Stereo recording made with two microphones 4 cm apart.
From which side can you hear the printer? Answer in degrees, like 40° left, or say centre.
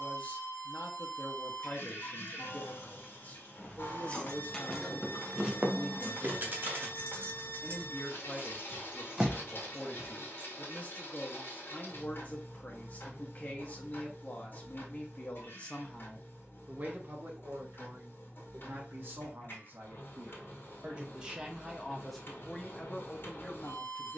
60° left.